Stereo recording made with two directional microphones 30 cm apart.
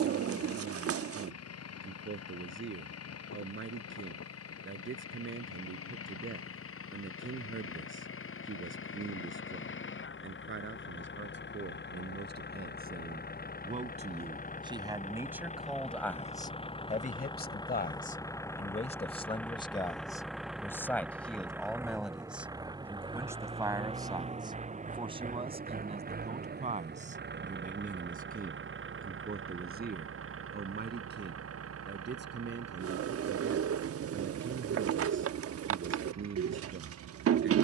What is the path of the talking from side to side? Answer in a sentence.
In this clip you hear the talking go left and come back.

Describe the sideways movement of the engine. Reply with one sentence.
In this clip you hear the engine go from the left side to the right.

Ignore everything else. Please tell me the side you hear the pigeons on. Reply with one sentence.
You can hear the pigeons on the right.